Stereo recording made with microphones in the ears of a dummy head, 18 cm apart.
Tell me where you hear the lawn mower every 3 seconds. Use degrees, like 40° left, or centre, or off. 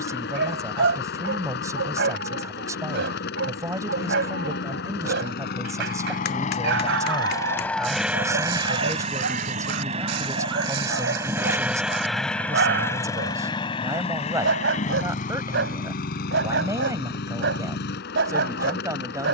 60° left, 60° left, 10° left, 20° right, 20° left, 50° left, 60° left.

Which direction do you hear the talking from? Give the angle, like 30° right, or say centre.
20° right.